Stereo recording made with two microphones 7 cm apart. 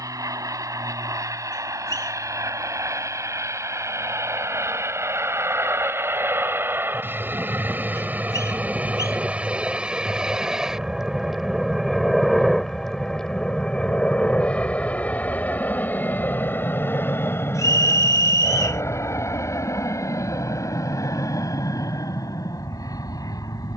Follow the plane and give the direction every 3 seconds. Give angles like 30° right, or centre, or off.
50° right, 40° right, 30° right, 10° right, 10° left, 30° left, 40° left, 50° left.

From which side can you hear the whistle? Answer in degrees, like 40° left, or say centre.
50° left.